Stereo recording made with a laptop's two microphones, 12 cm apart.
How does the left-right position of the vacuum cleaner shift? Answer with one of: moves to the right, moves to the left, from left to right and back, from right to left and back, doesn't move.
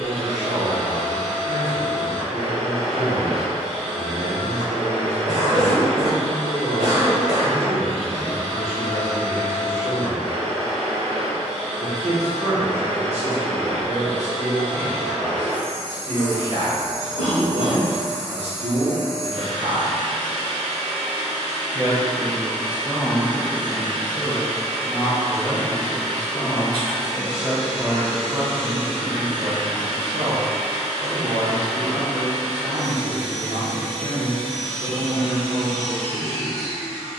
doesn't move.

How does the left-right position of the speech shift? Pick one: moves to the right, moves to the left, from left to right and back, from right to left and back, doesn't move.
from right to left and back.